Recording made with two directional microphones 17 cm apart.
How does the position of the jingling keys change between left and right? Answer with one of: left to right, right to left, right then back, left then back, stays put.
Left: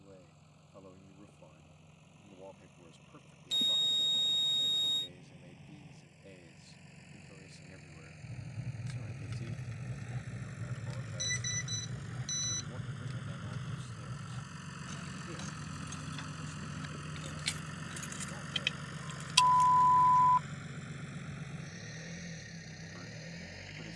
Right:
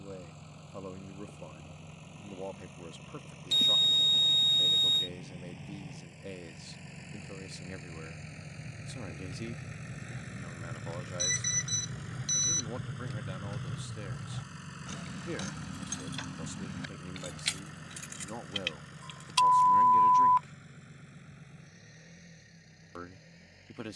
right then back.